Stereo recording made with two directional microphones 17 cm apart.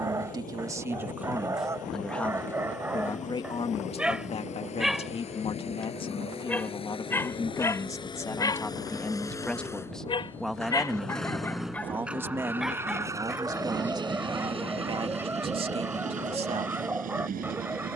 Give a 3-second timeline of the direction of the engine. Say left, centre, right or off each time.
left, left, left, centre, right, right.